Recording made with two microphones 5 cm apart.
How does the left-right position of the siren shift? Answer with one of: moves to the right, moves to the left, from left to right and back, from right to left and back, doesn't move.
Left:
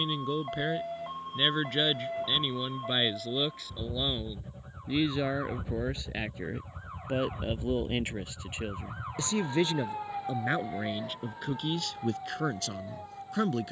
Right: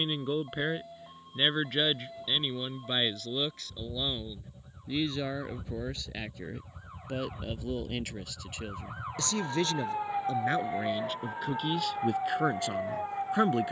moves to the right.